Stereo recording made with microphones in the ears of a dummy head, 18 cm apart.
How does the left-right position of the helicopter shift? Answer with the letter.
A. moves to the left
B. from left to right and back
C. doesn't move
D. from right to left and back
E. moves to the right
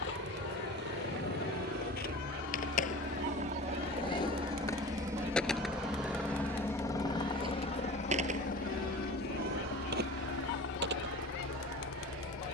A.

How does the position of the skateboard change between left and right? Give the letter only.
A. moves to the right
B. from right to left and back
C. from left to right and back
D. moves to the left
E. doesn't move
A.